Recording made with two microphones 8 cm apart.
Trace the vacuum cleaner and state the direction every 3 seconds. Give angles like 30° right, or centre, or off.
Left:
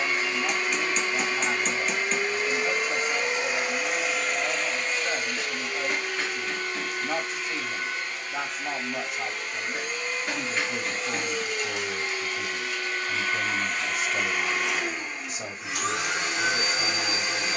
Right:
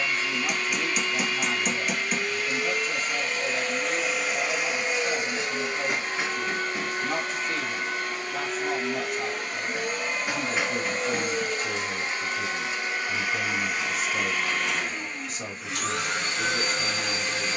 20° left, 10° right, 50° right, 40° right, 10° right, 10° left.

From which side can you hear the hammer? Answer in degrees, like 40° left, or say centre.
10° right.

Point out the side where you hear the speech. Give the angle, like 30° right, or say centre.
10° left.